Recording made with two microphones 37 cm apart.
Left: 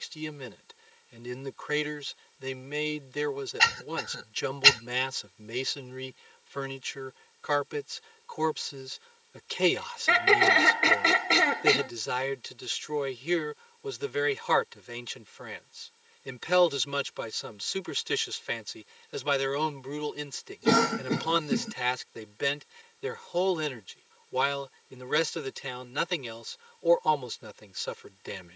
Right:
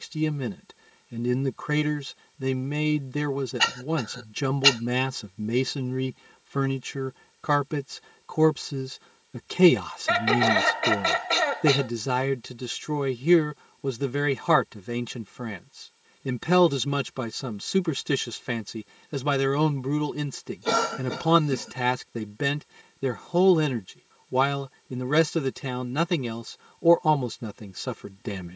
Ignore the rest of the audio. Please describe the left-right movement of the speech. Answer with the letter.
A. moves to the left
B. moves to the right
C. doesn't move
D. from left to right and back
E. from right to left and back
C.